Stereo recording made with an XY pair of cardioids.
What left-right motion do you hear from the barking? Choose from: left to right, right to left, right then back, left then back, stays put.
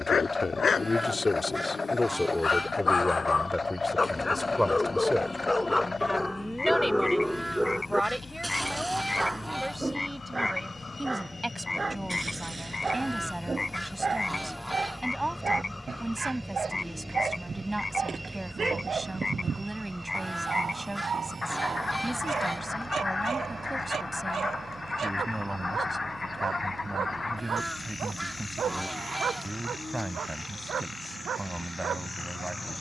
left to right.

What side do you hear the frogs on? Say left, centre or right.
left.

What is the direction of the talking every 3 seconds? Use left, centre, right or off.
left, centre, centre, centre, centre, centre, centre, centre, centre, centre, centre.